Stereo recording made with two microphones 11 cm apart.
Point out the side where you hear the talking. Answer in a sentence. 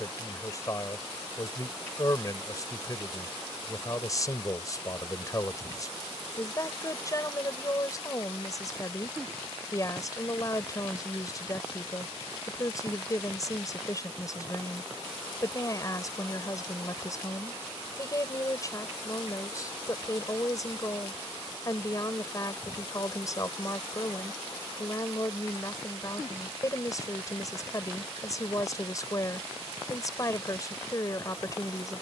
You can hear the talking on the left.